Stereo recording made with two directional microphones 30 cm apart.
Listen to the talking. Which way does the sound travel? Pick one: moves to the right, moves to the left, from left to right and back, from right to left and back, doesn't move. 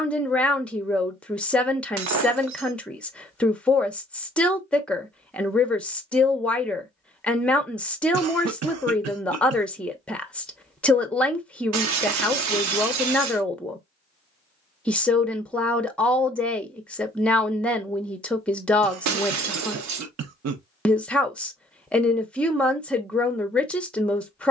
doesn't move.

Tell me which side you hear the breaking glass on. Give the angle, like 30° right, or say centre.
60° right.